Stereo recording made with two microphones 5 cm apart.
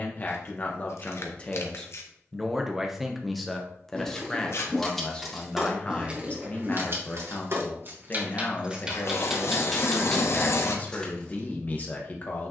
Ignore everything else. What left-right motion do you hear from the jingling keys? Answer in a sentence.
You can hear the jingling keys go right and come back.